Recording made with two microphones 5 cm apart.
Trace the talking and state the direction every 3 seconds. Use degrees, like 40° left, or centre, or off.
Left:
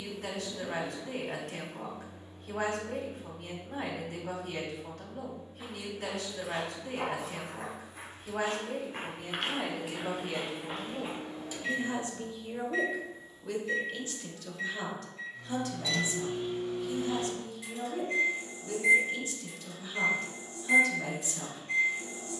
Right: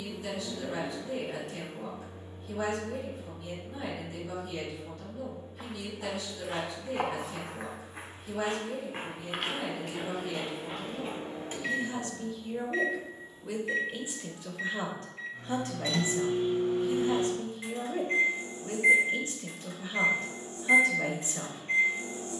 60° left, 60° left, 60° left, 50° left, 10° right, 40° right, 40° right, 40° right.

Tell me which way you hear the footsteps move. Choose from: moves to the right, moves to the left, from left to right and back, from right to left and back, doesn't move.
moves to the left.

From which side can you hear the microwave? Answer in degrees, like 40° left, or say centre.
40° right.